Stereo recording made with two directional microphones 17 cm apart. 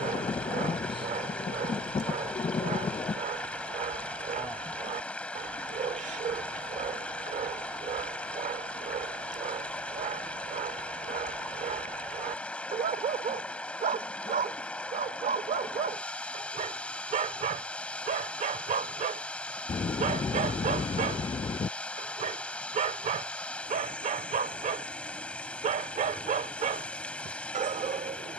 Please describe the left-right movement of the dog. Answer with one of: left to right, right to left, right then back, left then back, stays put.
stays put.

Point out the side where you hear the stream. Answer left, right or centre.
centre.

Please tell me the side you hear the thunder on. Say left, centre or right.
left.